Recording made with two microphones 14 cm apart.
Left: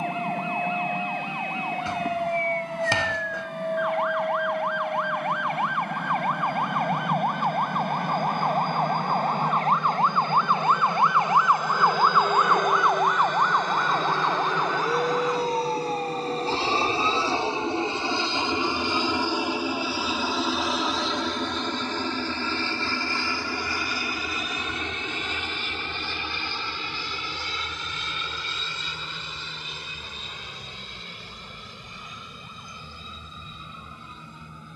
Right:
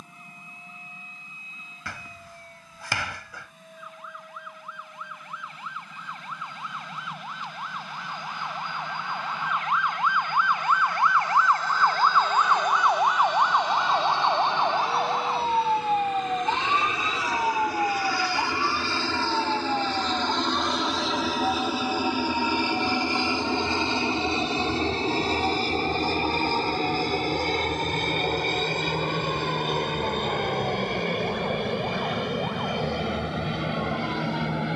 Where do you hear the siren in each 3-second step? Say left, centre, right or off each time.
left, left, left, left, centre, right, right, right, right, right, right, right.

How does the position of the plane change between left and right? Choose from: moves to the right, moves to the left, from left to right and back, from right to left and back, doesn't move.
moves to the right.